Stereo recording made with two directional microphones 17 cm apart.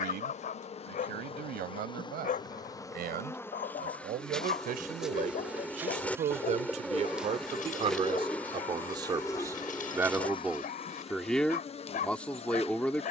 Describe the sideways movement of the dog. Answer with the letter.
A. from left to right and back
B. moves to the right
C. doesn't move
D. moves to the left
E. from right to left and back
C.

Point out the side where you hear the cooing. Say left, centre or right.
centre.